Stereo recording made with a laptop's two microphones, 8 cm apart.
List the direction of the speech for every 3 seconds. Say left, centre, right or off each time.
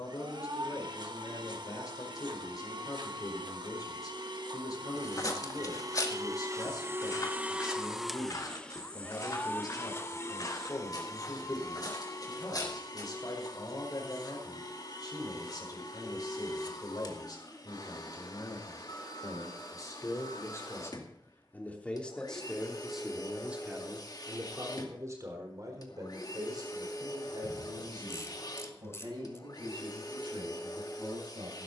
left, left, left, left, left, left, left, centre, right, right, right.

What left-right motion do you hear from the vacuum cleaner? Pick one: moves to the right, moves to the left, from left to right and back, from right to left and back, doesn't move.
moves to the left.